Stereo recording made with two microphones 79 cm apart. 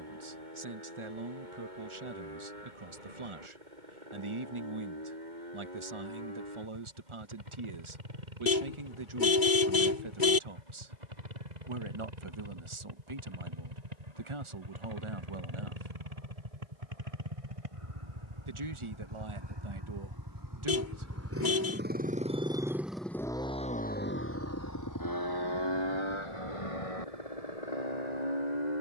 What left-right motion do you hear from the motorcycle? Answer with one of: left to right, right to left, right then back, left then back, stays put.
right to left.